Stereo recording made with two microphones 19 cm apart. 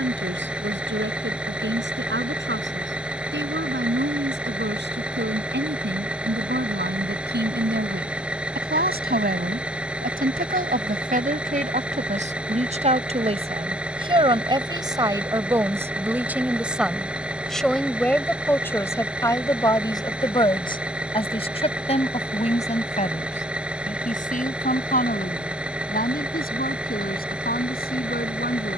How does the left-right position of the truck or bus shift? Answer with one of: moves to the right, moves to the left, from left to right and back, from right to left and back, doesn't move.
doesn't move.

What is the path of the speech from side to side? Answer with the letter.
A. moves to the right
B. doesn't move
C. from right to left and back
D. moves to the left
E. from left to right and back
D.